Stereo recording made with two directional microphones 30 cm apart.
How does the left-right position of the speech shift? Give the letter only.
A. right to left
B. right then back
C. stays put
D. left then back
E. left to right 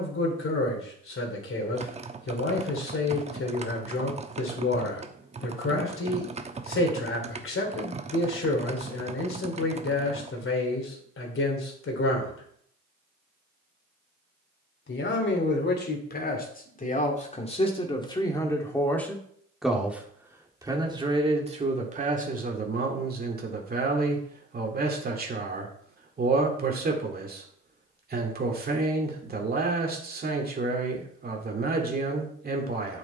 E.